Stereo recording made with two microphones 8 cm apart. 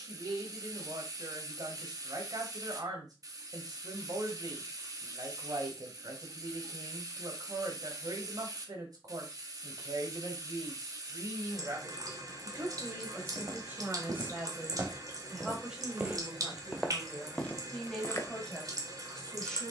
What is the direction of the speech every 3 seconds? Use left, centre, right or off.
right, right, right, right, right, centre, centre.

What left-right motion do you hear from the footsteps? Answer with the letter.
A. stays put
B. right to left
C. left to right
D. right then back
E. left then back
B.